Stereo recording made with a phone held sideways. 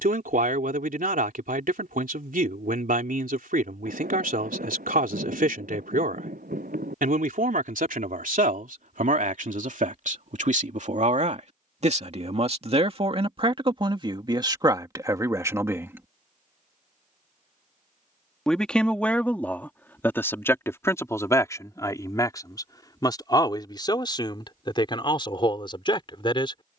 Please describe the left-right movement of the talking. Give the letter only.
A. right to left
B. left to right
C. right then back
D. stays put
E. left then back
A.